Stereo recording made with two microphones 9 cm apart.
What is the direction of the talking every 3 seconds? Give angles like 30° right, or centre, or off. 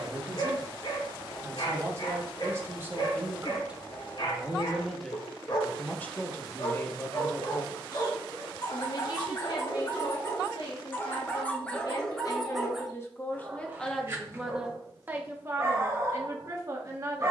30° right, centre, 30° left, 60° left, 20° left, 30° right.